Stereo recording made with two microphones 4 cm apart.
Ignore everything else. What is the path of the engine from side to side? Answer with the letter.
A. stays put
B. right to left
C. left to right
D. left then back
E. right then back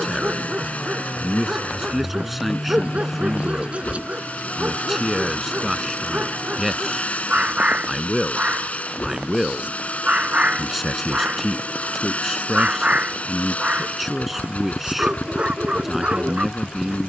A.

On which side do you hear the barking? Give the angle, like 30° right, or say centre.
30° right.